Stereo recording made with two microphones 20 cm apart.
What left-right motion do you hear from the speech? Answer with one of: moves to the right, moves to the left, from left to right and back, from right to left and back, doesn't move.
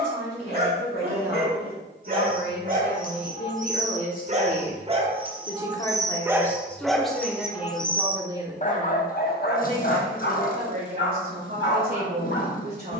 moves to the right.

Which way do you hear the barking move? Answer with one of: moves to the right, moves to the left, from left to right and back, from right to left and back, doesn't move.
moves to the left.